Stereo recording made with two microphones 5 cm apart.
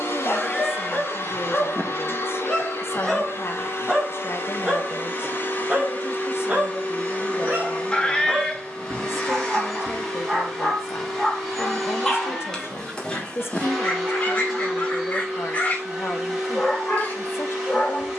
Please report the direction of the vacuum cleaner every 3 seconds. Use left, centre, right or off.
left, left, left, centre, centre, centre.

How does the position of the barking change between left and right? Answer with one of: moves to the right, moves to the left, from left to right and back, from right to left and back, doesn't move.
from left to right and back.